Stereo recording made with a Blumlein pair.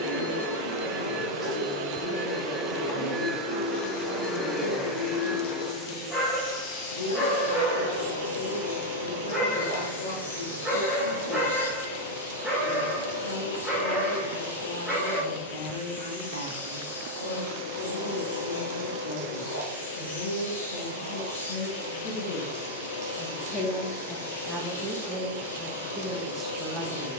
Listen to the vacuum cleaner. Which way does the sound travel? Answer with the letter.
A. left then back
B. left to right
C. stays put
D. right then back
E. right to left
E.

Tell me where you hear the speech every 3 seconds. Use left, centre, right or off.
left, left, left, left, left, left, left, left, centre.